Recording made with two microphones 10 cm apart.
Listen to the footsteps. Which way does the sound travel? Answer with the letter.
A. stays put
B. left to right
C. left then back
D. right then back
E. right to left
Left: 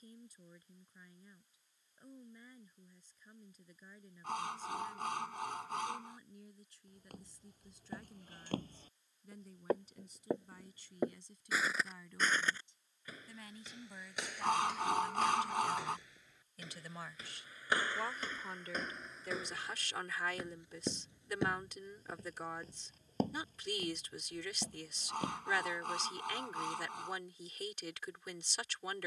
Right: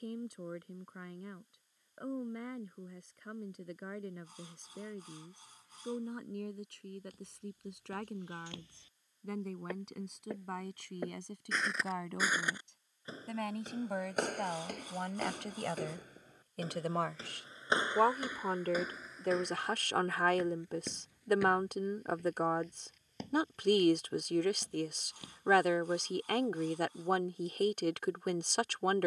D.